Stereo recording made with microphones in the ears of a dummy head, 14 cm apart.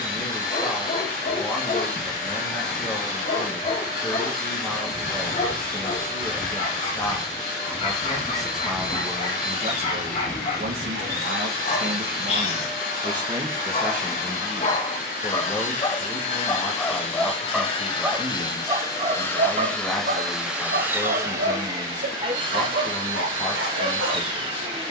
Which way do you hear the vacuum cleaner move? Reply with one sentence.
You can hear the vacuum cleaner travel towards the right.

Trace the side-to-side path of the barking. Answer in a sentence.
In this clip you hear the barking move from left to right.